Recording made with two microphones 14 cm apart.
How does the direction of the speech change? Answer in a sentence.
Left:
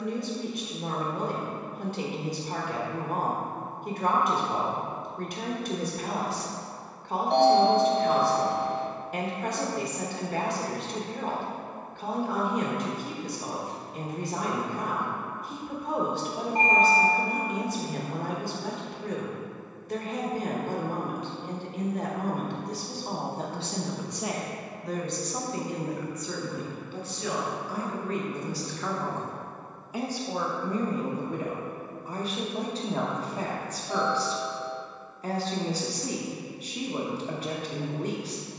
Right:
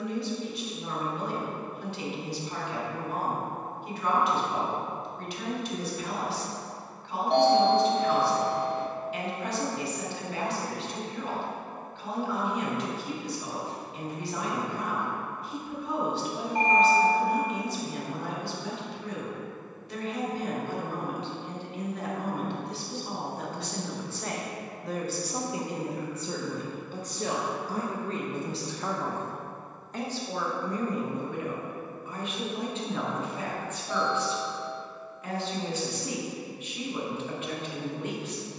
You can hear the speech move from left to right and back again.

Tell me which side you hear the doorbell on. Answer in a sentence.
In this clip you hear the doorbell in the centre.